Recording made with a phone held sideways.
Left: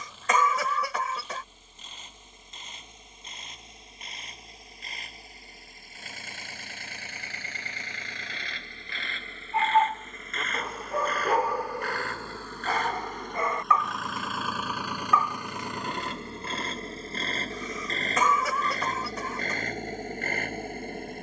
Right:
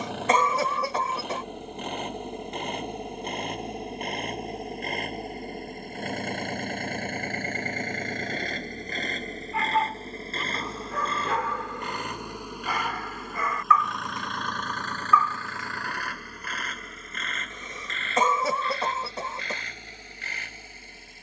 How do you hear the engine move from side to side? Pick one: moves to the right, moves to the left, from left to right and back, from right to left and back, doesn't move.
moves to the left.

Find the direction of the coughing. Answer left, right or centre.
right.